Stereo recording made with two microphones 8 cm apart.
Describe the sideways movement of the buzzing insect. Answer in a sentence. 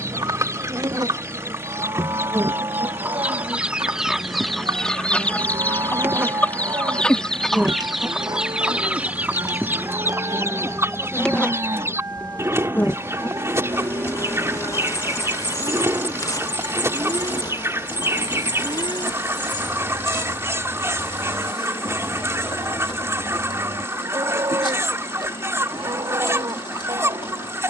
You can hear the buzzing insect go from the right side to the left.